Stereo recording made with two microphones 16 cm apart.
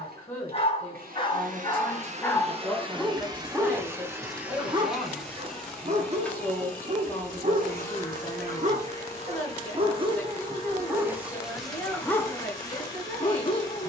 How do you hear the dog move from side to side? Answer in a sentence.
In this clip you hear the dog go right and come back.